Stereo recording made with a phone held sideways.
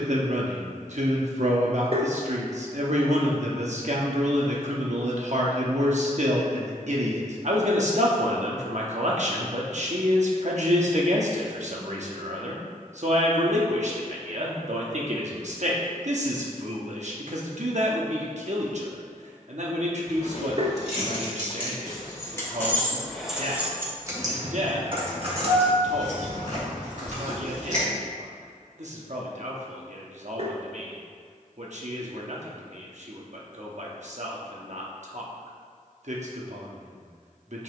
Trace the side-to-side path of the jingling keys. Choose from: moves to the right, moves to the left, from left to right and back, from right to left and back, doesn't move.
moves to the right.